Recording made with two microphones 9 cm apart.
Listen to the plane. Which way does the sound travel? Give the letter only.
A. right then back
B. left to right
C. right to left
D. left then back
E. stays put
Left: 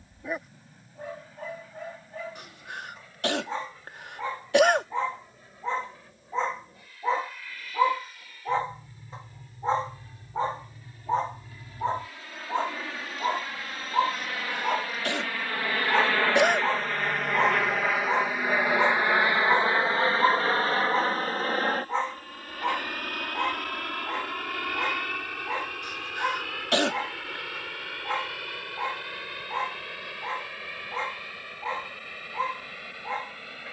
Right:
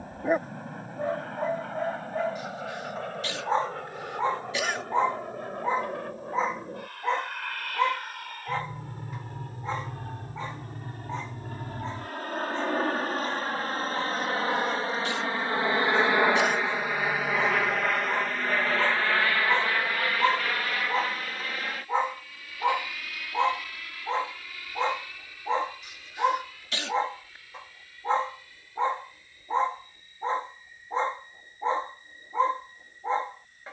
C.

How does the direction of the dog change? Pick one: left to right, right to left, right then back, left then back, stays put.
left then back.